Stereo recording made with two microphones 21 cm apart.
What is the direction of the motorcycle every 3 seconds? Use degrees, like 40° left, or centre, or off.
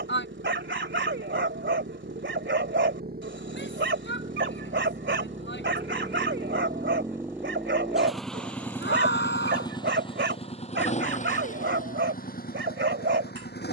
60° right, 40° right, 10° right, 30° left, 50° left.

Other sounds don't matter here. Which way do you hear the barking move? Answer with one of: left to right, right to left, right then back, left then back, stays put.
stays put.